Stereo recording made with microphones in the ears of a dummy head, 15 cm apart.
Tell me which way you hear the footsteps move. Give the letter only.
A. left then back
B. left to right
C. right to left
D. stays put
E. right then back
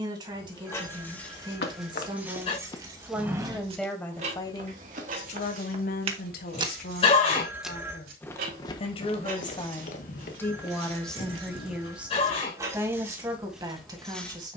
E.